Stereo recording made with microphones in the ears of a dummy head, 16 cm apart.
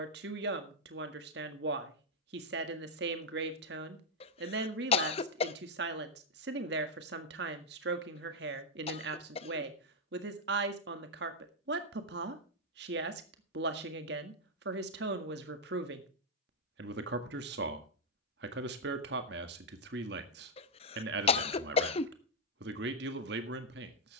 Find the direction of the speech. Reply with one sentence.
In this clip you hear the speech on the right.